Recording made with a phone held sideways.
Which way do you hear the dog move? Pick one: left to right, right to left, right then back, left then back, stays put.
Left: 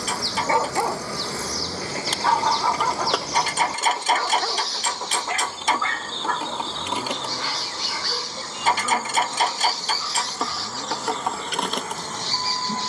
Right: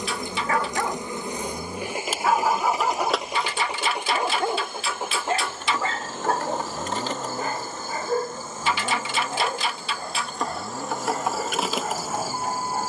left to right.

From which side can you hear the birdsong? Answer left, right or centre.
left.